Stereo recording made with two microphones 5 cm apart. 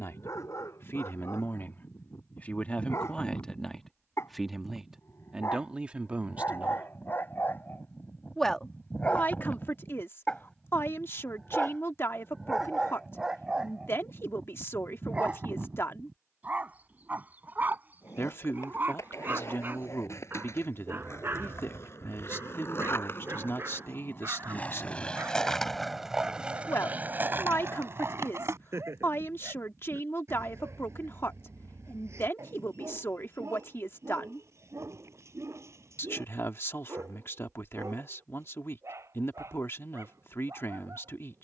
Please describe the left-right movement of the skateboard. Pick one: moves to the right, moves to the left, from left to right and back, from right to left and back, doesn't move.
moves to the right.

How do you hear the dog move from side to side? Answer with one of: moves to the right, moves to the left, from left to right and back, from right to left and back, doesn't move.
moves to the right.